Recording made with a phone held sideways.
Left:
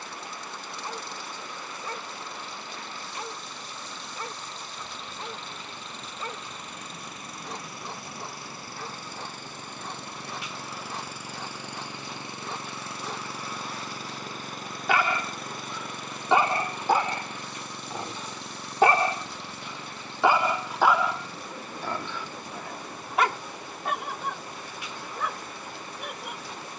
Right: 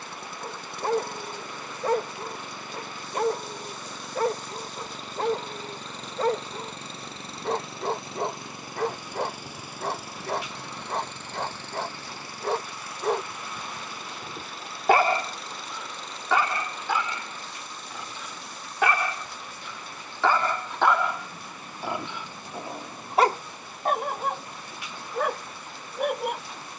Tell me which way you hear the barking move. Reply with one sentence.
You can hear the barking go left and come back.